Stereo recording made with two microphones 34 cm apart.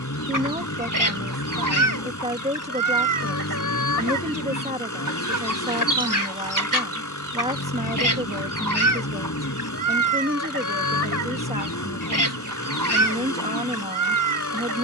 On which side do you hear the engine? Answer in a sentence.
In this clip you hear the engine on the left.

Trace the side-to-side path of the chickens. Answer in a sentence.
You can hear the chickens stay put.